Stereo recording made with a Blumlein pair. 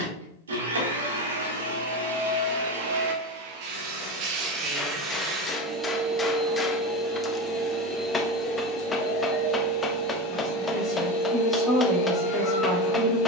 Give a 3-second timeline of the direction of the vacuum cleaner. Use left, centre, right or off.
right, right, centre, left, left.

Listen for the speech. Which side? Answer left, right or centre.
centre.